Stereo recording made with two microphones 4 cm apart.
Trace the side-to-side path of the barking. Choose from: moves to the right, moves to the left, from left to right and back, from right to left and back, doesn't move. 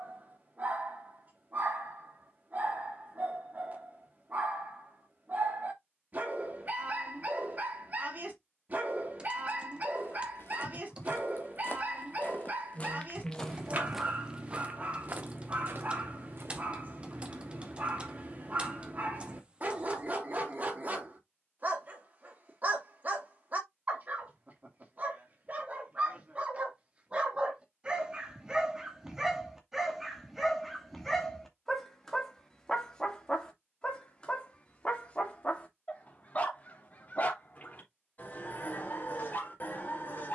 moves to the left.